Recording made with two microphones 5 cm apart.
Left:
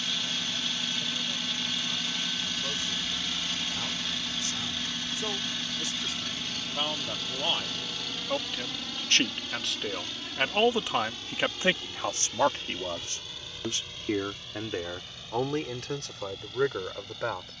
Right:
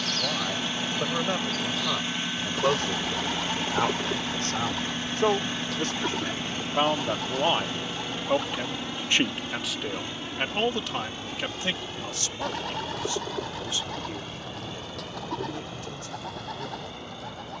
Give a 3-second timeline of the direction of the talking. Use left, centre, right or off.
right, right, right, centre, left, left.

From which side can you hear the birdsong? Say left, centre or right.
right.